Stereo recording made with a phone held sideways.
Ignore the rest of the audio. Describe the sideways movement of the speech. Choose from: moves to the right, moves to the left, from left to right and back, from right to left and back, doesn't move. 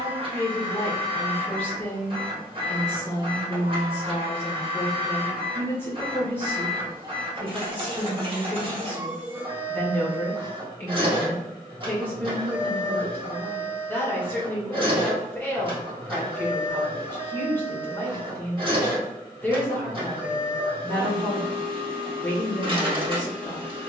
doesn't move.